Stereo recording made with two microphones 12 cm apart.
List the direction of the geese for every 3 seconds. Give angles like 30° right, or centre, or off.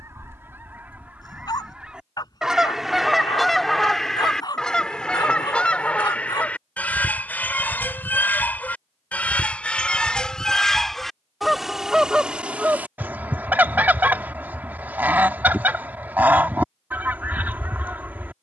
10° right, 10° left, 10° left, 10° left, 10° right, 10° right.